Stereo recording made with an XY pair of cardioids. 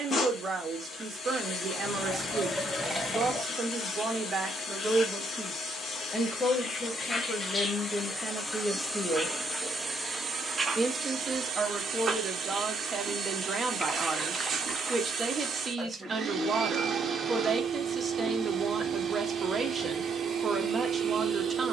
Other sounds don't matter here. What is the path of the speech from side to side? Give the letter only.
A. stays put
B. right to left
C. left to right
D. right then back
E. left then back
E.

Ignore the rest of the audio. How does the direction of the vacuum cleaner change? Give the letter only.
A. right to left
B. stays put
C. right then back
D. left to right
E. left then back
D.